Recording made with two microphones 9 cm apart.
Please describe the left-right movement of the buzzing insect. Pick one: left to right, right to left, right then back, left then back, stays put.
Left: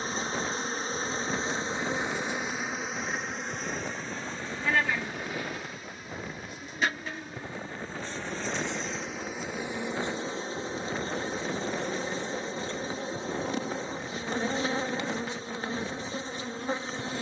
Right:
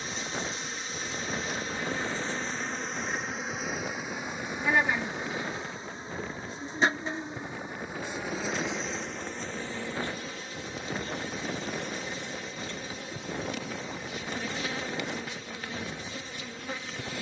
right then back.